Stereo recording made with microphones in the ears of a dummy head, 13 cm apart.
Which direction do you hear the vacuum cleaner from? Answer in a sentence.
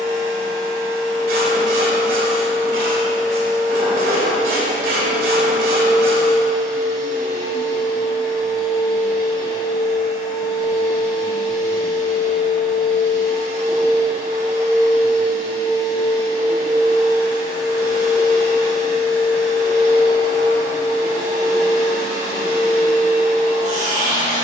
In this clip you hear the vacuum cleaner on the right.